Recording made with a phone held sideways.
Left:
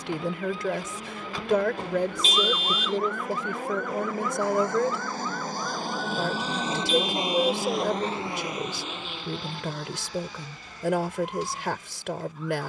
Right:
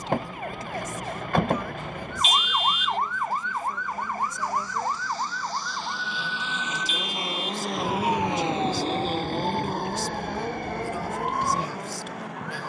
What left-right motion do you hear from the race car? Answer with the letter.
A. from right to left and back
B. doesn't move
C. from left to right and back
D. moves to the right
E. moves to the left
D.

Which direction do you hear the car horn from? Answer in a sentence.
You can hear the car horn on the left.